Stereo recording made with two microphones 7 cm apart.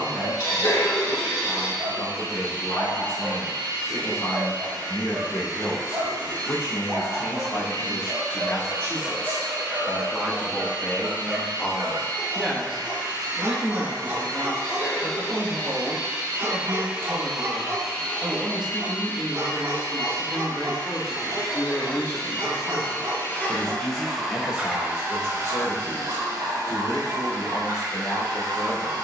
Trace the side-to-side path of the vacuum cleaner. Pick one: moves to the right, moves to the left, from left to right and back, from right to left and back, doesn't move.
from right to left and back.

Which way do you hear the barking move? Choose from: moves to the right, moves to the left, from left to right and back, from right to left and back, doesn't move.
doesn't move.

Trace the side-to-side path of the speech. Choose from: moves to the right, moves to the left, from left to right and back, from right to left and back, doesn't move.
from left to right and back.